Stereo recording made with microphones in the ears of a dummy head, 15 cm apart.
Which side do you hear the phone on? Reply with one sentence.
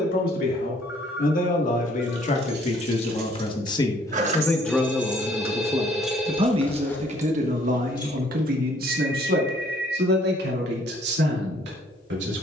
In this clip you hear the phone in the centre.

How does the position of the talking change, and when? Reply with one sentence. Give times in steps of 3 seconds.
In this clip you hear the talking on the left from 0 s, in the centre from 3 s and on the right from 6 s.